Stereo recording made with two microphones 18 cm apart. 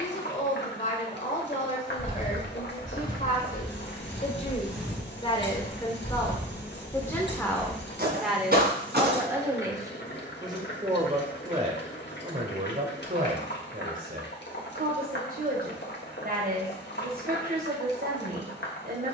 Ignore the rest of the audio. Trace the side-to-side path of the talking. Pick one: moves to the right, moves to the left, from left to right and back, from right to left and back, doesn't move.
moves to the right.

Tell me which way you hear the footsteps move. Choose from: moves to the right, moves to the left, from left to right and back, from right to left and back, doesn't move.
moves to the right.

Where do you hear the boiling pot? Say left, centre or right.
left.